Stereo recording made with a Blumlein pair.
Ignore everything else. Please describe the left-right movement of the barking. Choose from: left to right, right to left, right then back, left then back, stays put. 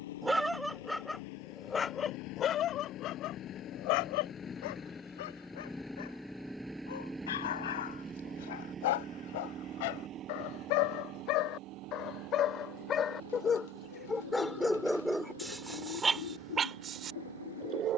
left then back.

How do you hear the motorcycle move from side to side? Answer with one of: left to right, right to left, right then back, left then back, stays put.
left to right.